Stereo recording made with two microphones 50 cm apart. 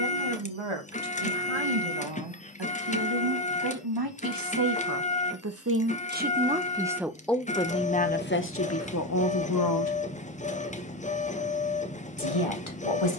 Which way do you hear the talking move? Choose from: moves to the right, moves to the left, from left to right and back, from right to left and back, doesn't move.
moves to the left.